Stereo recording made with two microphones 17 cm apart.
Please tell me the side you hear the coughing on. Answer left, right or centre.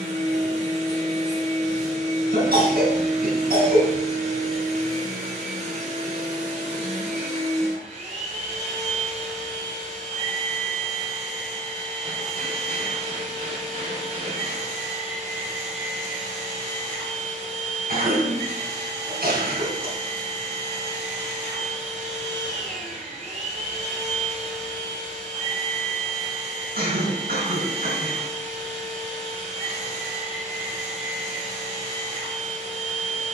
right.